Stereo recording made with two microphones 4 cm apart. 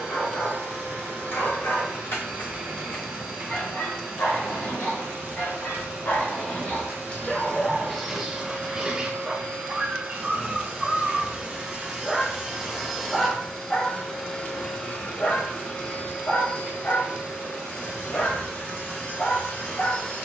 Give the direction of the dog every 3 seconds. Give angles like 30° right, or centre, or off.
70° left, 70° left, 20° left, 20° right, 20° left, 50° left, 70° left.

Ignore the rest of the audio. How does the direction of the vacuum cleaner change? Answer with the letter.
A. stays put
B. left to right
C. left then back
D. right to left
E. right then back
D.